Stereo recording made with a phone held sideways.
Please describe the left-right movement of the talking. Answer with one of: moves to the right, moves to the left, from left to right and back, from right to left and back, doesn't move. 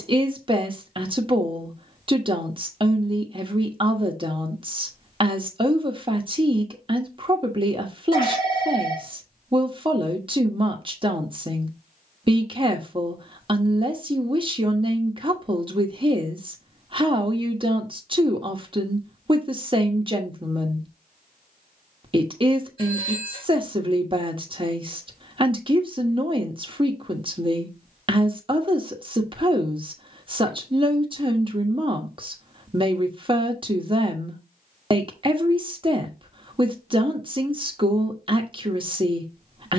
doesn't move.